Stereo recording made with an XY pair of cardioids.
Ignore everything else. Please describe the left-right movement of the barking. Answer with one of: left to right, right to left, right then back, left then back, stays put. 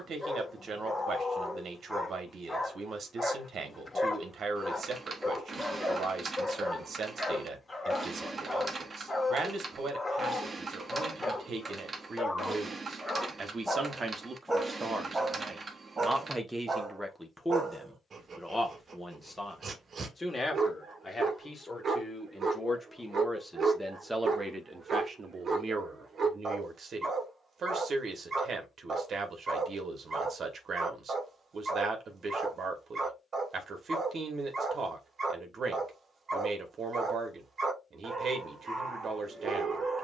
left to right.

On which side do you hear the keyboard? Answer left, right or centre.
right.